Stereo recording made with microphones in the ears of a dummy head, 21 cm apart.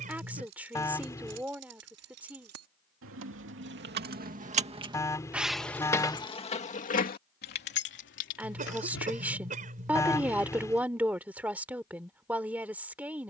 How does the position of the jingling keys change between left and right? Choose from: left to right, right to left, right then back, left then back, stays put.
right to left.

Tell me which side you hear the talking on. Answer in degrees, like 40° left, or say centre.
10° right.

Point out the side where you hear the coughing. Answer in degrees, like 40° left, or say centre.
30° right.